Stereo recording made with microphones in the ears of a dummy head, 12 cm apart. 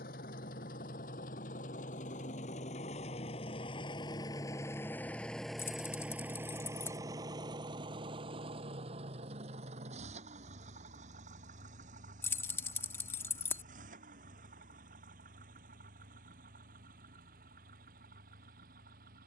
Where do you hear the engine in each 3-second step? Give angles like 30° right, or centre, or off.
60° left, 20° left, 30° right, 50° right, 60° right, 70° right, 70° right.